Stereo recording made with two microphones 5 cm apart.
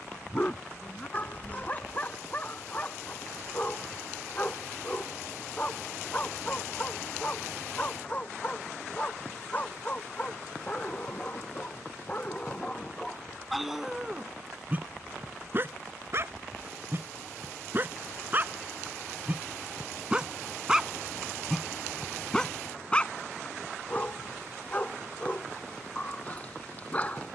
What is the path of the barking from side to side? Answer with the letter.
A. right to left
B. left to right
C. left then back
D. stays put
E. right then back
E.